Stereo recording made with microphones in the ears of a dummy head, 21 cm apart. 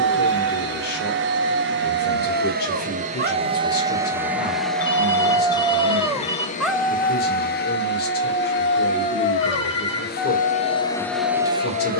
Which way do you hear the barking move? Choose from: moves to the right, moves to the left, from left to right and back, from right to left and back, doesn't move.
moves to the left.